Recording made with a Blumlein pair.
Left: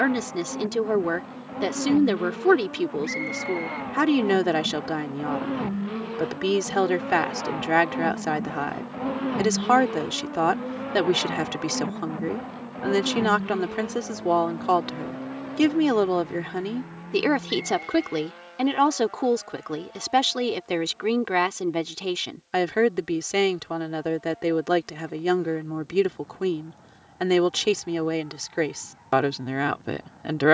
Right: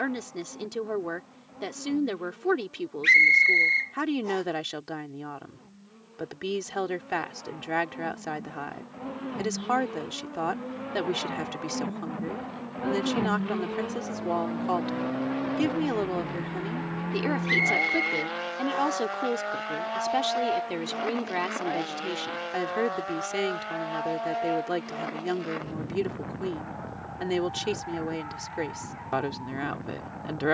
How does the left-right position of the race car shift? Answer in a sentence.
In this clip you hear the race car go from the left side to the right.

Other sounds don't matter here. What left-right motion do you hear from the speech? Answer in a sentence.
You can hear the speech stay in one place.